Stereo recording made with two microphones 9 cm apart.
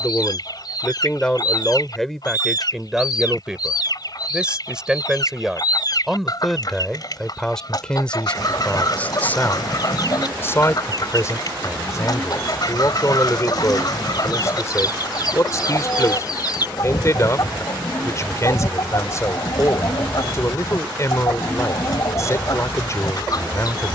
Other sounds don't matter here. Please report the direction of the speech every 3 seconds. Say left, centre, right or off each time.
centre, centre, centre, left, left, left, left, left.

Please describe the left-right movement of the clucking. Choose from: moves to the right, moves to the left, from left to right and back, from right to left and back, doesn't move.
doesn't move.